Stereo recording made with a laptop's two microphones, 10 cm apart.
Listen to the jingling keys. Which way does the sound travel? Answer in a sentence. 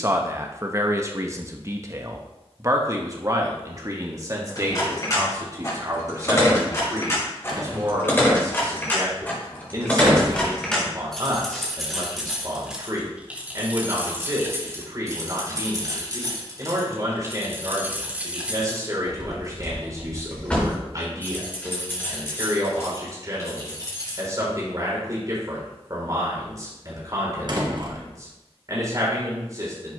You can hear the jingling keys move from left to right and back again.